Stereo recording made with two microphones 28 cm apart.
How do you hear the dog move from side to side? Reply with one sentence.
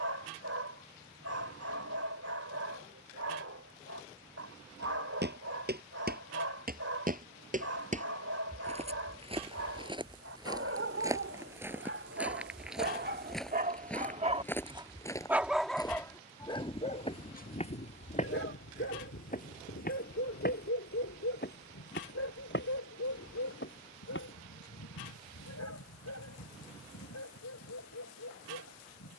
You can hear the dog go from the right side to the left.